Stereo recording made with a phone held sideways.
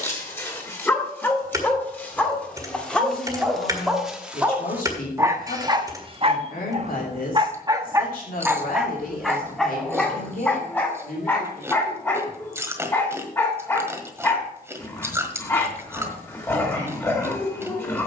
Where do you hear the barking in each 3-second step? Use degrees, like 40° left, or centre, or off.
10° left, 10° right, 30° right, 10° left, 20° left, 20° left.